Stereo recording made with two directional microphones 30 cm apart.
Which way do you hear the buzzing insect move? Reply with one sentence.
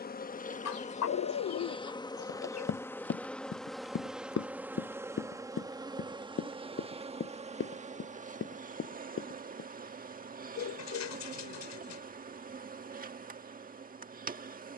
In this clip you hear the buzzing insect travel towards the right.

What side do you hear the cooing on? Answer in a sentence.
You can hear the cooing on the left.